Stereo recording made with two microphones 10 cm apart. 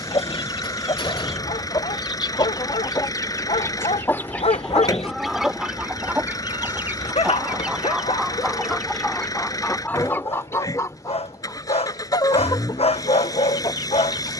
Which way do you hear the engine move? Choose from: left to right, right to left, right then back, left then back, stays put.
stays put.